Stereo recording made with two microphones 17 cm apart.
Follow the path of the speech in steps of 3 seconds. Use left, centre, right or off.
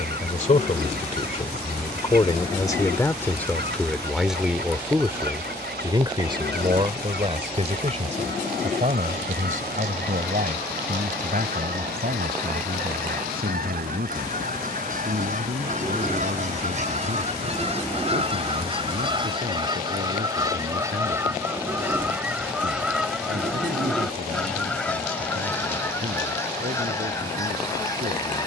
left, centre, right, right, right, right, right, right, right, right.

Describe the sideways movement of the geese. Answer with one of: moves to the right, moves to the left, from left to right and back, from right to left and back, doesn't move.
moves to the left.